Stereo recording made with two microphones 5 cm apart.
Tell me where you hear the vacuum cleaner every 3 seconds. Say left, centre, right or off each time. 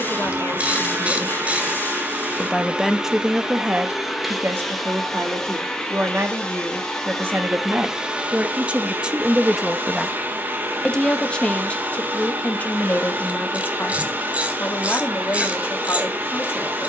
right, centre, centre, right, right, right.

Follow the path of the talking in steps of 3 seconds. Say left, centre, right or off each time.
left, right, right, centre, left, left.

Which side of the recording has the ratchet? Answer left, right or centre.
right.